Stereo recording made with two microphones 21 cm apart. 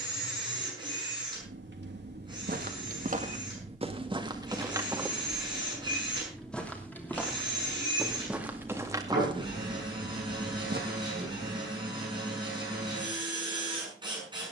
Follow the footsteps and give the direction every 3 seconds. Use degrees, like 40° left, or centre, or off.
60° right, 20° right, centre, 40° right, off.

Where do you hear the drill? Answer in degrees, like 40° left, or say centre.
20° right.